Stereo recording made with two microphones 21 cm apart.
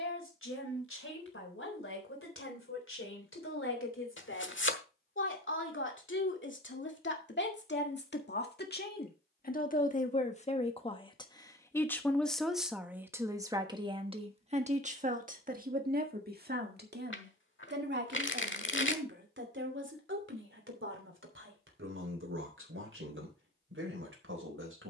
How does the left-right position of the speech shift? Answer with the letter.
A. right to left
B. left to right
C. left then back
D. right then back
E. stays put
B.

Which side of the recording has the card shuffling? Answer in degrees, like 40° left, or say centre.
60° left.